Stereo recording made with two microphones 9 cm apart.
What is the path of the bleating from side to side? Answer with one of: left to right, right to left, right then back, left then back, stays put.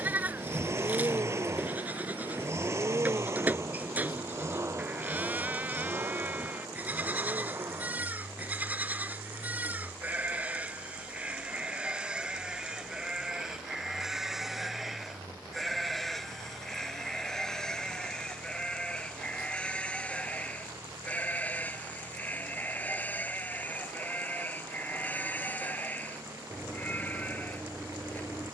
right to left.